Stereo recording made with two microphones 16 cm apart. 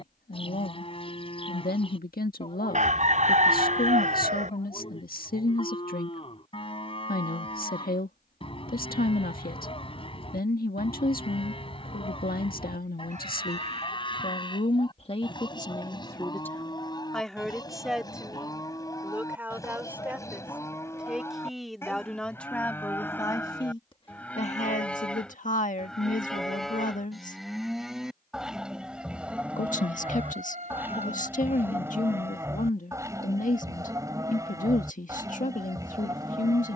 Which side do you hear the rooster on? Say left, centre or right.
right.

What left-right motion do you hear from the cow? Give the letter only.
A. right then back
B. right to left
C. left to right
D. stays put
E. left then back
C.